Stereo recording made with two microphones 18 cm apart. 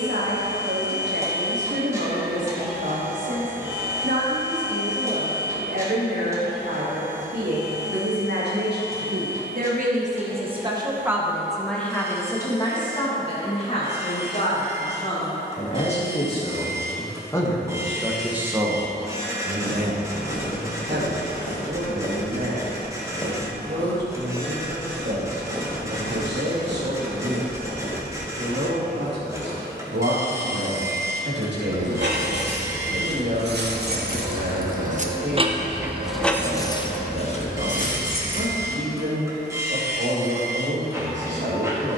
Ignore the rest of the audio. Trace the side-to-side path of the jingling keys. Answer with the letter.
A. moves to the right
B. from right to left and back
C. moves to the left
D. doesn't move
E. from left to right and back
C.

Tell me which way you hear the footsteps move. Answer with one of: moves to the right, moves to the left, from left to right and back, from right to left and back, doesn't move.
moves to the right.